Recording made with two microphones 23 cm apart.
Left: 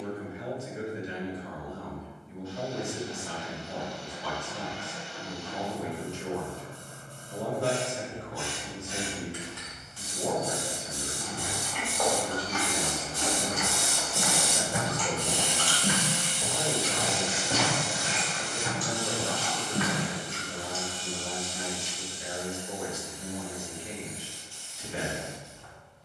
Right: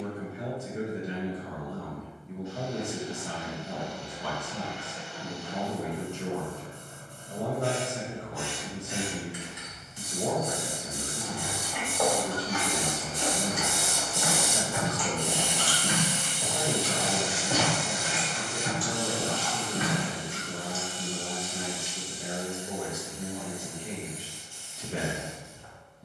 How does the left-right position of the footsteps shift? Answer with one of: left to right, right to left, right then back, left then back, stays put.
left then back.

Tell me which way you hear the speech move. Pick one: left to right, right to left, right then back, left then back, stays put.
stays put.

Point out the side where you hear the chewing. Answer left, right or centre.
centre.